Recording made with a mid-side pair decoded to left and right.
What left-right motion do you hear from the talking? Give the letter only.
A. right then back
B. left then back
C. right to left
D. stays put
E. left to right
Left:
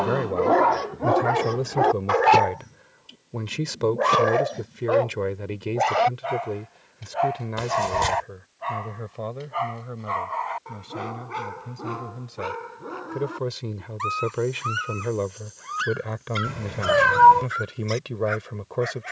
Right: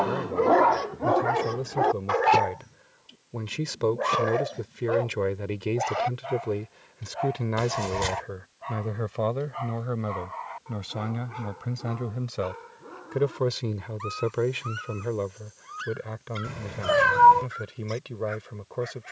A.